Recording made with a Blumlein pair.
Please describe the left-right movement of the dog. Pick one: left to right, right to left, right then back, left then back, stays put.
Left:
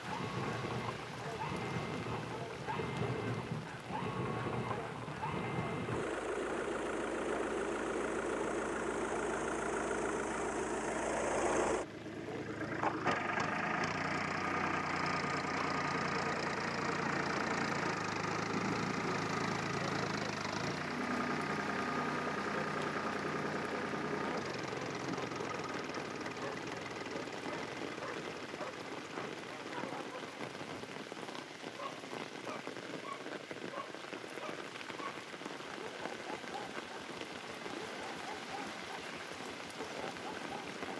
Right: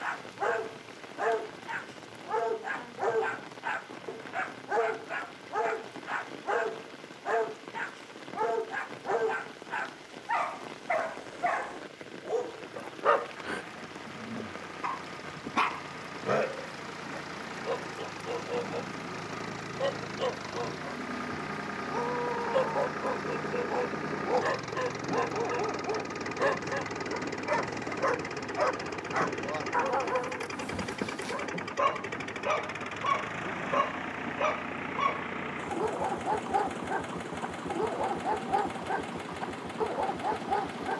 stays put.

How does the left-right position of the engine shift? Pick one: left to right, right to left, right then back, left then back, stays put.
left to right.